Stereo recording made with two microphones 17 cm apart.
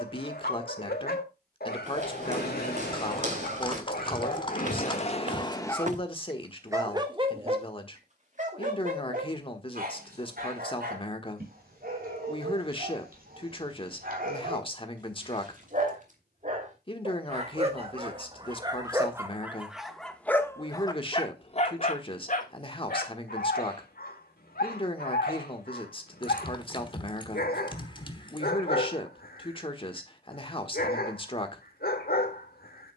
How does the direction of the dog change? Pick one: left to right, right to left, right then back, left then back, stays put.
right then back.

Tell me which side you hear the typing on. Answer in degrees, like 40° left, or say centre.
30° left.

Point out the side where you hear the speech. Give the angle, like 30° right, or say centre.
30° left.